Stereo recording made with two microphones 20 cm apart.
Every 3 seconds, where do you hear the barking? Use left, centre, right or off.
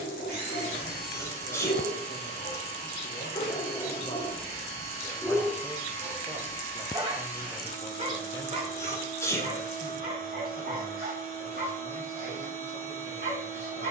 left, centre, right, right, right.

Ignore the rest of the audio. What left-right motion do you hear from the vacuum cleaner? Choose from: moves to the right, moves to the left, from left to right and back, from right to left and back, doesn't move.
doesn't move.